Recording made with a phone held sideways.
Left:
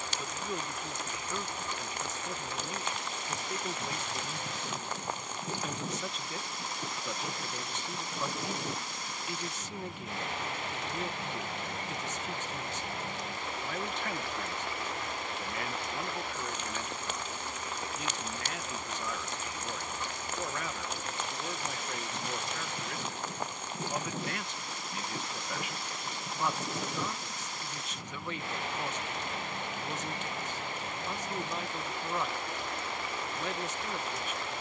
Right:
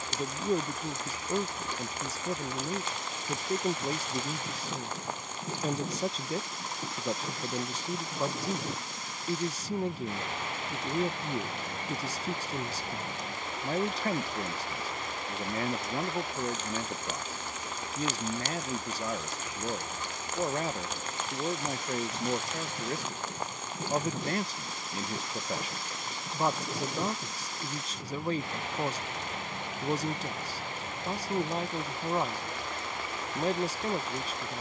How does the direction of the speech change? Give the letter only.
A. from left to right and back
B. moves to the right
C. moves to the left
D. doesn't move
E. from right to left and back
D.